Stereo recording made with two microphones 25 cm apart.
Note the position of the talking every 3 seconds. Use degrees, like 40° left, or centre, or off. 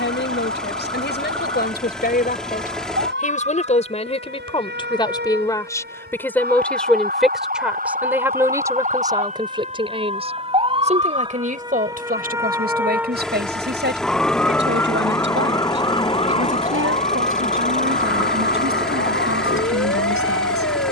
40° left, 20° left, centre, 20° right, 40° right, 50° right, 60° right.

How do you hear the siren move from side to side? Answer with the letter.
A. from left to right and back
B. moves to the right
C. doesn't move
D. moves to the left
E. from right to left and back
D.